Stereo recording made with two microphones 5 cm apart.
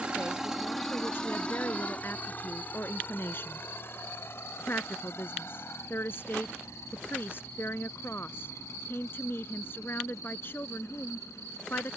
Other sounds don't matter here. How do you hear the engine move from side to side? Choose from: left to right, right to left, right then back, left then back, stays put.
right to left.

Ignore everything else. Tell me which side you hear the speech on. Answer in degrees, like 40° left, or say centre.
50° left.